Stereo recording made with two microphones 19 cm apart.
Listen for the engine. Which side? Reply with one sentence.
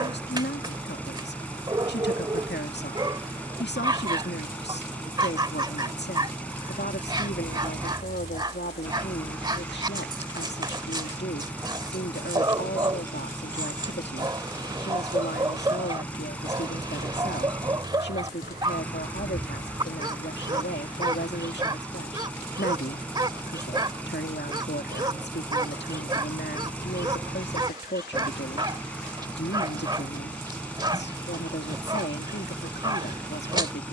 You can hear the engine in the centre.